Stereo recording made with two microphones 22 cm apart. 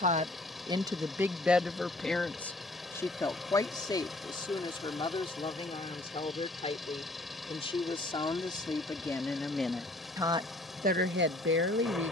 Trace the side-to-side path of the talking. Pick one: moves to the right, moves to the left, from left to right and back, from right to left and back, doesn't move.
from right to left and back.